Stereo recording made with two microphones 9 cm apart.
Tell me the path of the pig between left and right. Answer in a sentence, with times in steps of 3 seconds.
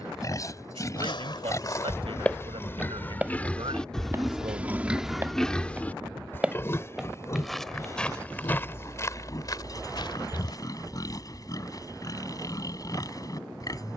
In this clip you hear the pig on the left from 0 s, in the centre from 3 s and on the left from 6 s.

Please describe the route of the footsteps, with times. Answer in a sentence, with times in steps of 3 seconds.
In this clip you hear the footsteps on the left from 0 s, on the right from 3 s, in the centre from 6 s, on the left from 9 s and not at all from 12 s.